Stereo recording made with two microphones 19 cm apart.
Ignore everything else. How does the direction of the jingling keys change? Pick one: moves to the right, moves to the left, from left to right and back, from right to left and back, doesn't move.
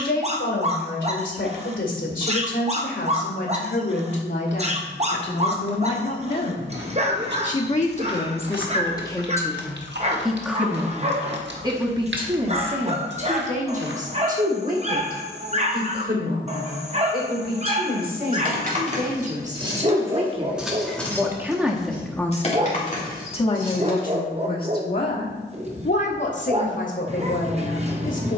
moves to the left.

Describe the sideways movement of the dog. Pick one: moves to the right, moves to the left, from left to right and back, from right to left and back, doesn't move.
doesn't move.